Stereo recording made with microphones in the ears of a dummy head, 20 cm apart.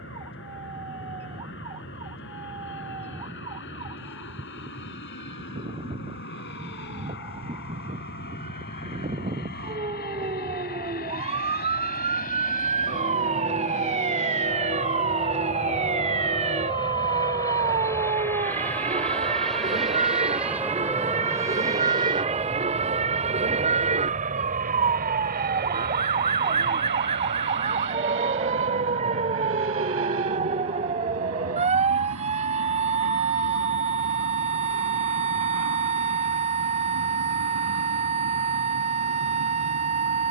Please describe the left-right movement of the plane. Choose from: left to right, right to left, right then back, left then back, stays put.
left to right.